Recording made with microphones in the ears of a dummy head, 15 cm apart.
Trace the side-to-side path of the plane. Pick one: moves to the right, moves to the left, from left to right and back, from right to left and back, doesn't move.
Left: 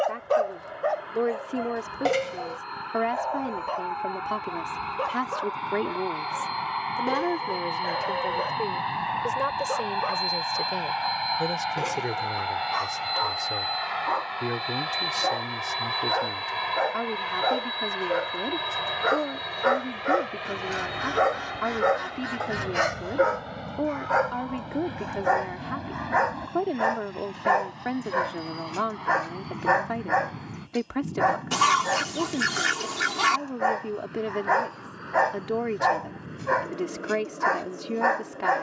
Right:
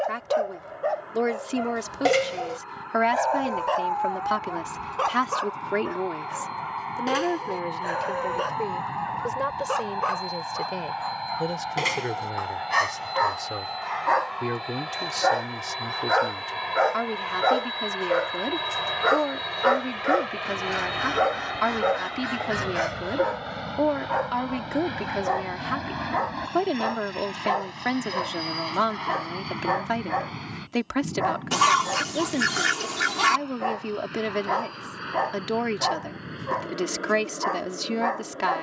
moves to the right.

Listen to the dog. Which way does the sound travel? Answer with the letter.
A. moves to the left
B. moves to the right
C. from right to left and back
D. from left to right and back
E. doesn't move
D.